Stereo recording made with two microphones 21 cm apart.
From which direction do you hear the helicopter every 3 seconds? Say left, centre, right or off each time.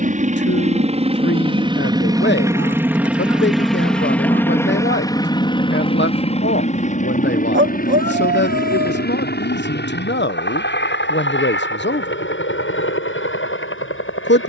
right, centre, left, left, left.